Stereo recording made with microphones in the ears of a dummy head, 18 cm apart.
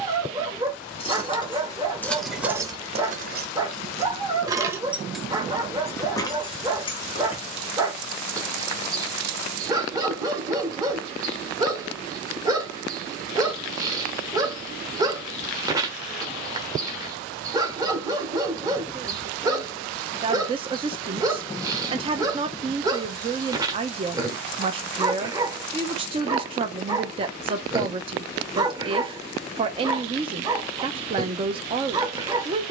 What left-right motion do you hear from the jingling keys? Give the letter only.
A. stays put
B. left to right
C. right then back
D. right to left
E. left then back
C.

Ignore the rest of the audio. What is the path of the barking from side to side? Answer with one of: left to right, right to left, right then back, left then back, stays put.
stays put.